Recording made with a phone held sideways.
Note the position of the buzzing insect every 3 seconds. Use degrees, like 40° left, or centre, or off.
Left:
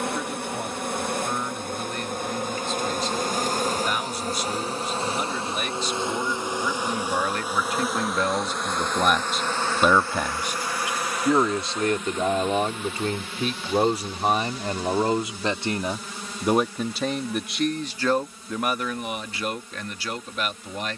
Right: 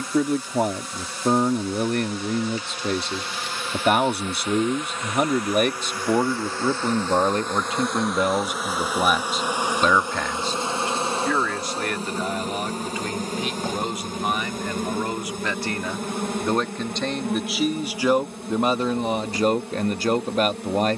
50° left, 30° left, 10° left, 20° right, 40° right, 50° right, 60° right.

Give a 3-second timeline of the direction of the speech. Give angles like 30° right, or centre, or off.
60° right, 60° right, 30° right, 10° left, 30° left, 10° left, 40° right.